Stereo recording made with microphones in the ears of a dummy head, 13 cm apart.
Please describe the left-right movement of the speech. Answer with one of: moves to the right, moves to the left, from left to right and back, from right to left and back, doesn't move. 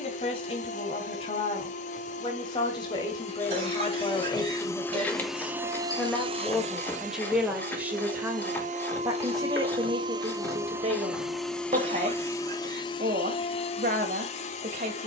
moves to the right.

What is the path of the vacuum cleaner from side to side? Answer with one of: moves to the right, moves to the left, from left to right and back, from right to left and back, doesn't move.
from left to right and back.